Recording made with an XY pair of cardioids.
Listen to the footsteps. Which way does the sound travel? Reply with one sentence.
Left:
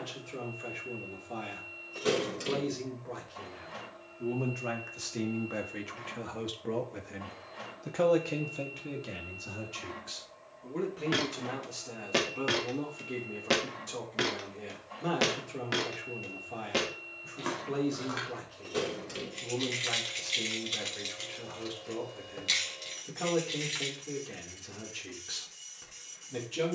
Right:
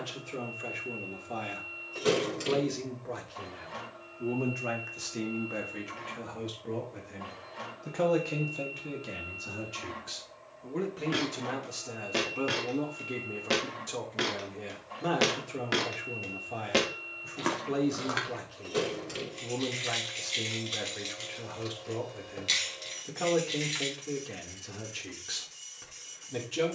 You can hear the footsteps move to the right.